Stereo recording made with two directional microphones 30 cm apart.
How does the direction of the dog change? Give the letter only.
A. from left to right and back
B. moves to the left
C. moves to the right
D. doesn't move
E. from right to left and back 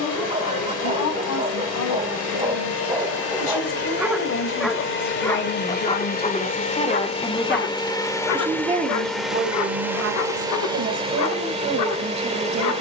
B.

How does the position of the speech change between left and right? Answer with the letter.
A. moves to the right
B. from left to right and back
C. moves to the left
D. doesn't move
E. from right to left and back
A.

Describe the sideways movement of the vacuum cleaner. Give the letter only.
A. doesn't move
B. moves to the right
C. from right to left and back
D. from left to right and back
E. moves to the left
B.